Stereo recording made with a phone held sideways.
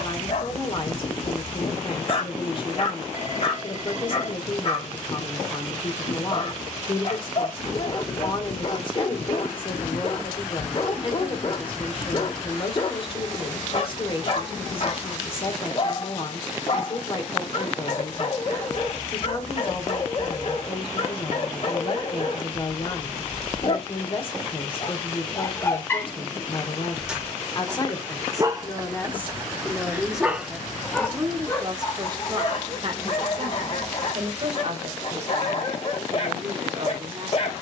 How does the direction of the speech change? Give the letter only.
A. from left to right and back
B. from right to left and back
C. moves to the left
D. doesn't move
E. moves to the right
E.